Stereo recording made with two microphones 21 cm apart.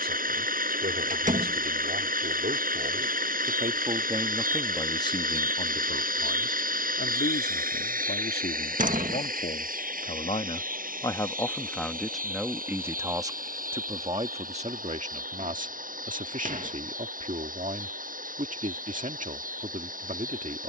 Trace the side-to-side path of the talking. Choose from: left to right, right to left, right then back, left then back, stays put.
left then back.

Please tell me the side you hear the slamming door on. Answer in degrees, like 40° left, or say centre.
40° right.